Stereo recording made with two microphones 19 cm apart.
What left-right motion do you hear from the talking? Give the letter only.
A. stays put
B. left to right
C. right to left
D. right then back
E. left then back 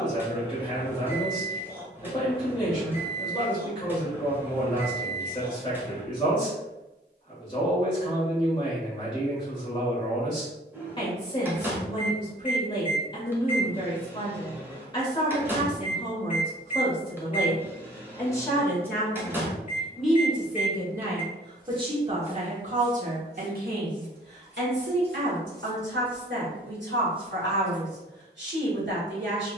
B.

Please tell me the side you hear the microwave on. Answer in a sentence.
In this clip you hear the microwave in the centre.